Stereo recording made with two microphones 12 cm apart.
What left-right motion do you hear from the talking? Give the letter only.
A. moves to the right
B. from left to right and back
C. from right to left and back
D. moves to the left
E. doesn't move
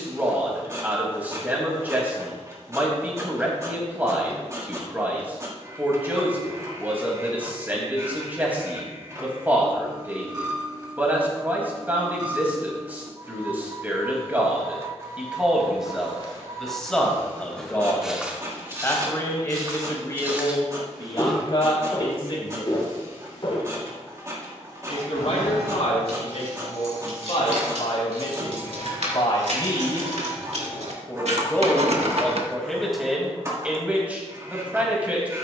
C.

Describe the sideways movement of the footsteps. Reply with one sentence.
You can hear the footsteps move from left to right and back again.